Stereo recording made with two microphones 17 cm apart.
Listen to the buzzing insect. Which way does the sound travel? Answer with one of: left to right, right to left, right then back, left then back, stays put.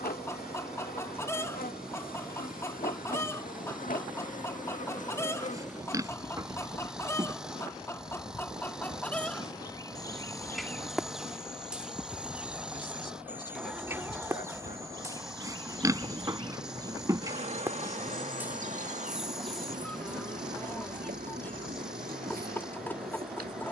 left to right.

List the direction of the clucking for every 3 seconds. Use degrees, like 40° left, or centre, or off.
20° left, 20° left, 20° left, centre, 10° right, 20° right, centre, 10° left.